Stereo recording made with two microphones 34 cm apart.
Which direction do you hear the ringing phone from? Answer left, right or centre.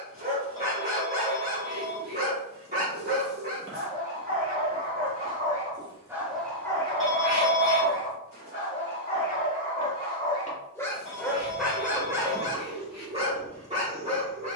right.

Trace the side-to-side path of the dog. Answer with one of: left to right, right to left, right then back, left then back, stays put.
left then back.